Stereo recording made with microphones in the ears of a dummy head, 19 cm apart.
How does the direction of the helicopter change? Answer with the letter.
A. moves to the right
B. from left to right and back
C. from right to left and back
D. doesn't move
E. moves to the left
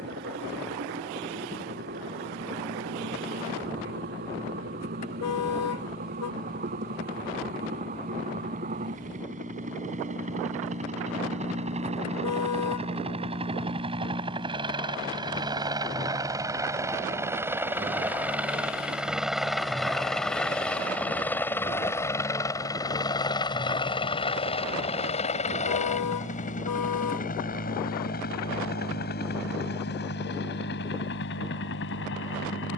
E.